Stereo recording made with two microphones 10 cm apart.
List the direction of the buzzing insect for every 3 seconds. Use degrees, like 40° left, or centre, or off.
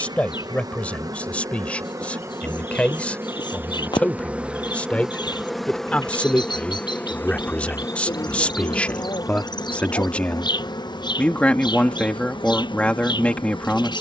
40° right, 10° right, 20° left, 50° left, 60° left.